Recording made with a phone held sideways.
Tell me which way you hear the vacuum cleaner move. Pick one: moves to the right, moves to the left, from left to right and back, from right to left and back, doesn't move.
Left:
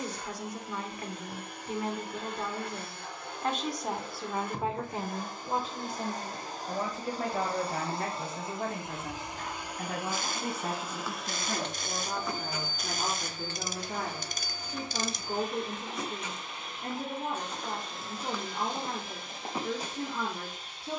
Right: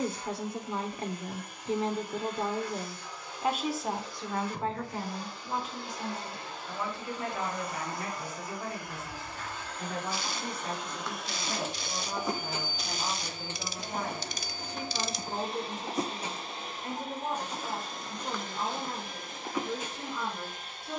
moves to the right.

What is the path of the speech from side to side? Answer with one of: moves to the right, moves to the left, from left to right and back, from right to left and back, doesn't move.
moves to the left.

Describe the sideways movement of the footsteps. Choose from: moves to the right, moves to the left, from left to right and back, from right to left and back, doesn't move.
from left to right and back.